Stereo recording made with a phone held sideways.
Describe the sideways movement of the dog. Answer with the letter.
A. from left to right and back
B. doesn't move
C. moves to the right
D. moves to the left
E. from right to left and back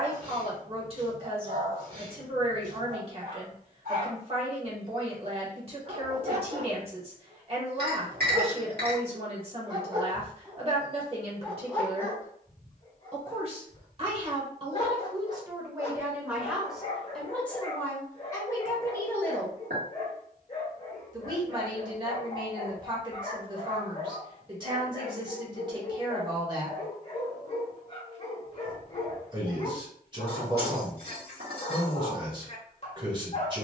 D.